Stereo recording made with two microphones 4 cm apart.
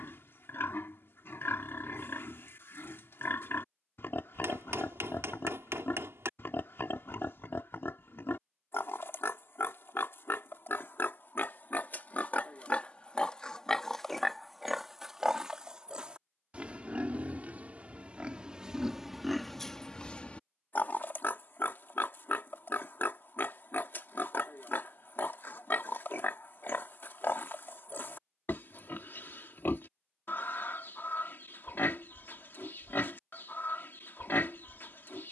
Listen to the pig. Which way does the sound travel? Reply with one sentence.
In this clip you hear the pig move from left to right and back again.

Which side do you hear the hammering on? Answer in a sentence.
In this clip you hear the hammering on the right.